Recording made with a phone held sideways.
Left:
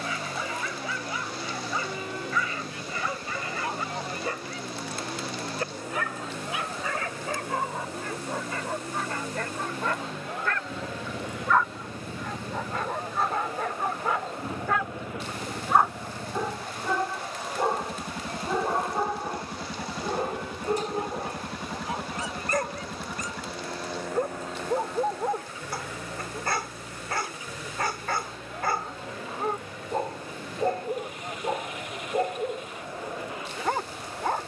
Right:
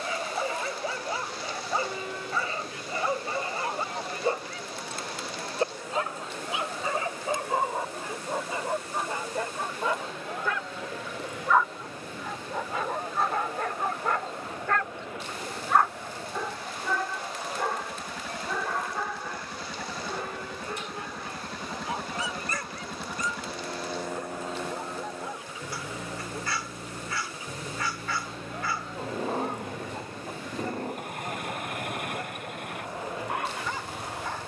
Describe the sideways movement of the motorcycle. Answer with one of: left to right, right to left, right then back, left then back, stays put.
left to right.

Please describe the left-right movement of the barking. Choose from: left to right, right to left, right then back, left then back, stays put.
right to left.